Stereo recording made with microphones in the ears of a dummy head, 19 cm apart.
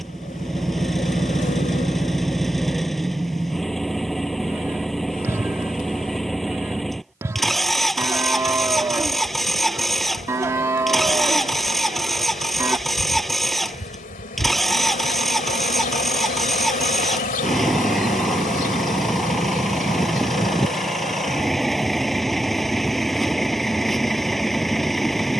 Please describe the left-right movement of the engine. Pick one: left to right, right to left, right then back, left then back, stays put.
stays put.